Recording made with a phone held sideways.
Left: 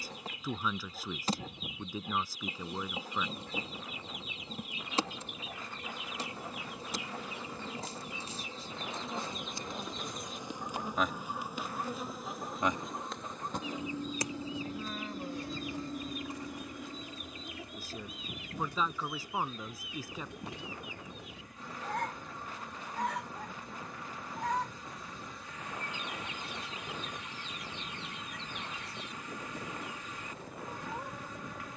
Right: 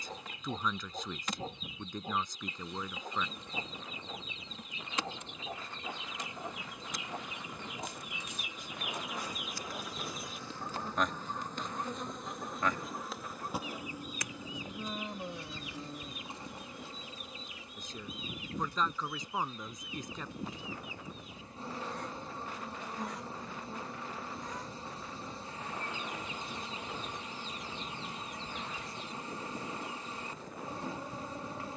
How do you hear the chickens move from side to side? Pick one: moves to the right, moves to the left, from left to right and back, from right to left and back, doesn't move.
moves to the left.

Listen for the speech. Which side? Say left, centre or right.
centre.